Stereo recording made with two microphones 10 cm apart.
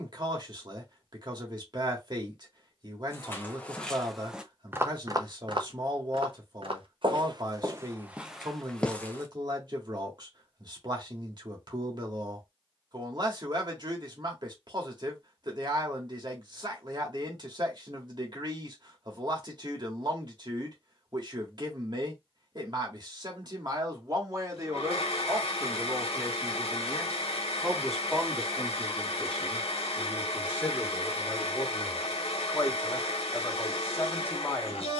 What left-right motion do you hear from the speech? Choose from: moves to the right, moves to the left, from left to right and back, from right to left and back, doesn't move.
moves to the left.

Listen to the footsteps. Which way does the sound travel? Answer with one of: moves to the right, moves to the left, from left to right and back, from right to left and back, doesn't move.
from left to right and back.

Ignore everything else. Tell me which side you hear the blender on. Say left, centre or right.
left.